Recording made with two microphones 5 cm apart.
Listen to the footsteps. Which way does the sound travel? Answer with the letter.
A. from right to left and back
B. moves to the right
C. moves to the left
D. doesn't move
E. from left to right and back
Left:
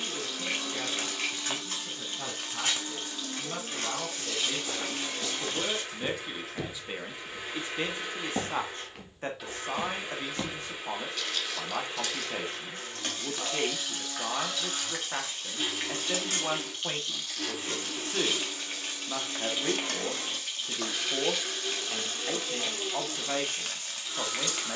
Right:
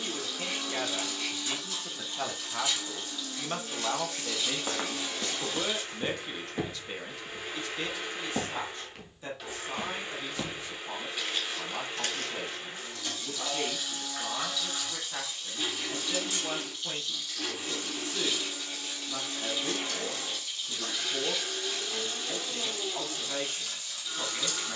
A.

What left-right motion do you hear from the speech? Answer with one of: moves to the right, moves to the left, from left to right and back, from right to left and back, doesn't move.
moves to the left.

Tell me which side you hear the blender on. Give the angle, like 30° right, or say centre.
centre.